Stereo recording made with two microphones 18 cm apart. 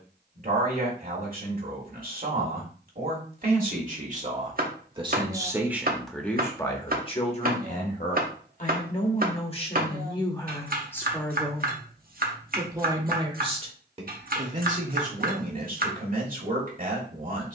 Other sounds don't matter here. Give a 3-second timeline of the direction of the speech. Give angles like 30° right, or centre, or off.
50° right, 30° right, 30° left, 20° left, 30° right, 50° right.